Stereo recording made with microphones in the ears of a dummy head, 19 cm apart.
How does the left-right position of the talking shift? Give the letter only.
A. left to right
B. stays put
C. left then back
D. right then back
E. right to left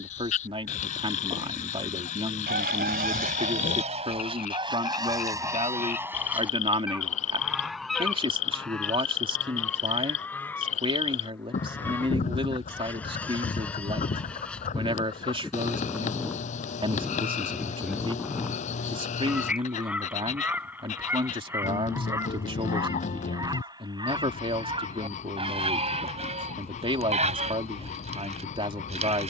B.